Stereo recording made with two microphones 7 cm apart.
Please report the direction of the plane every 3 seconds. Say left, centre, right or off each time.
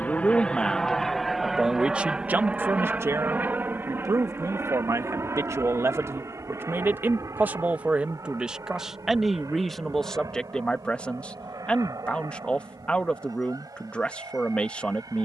centre, right, right, right, right.